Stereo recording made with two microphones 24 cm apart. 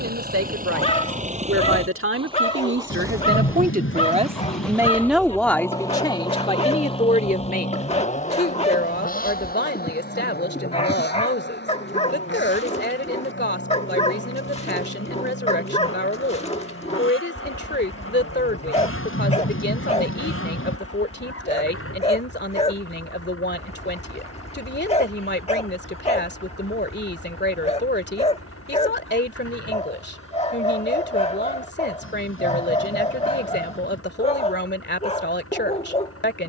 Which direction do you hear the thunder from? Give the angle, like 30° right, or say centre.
60° left.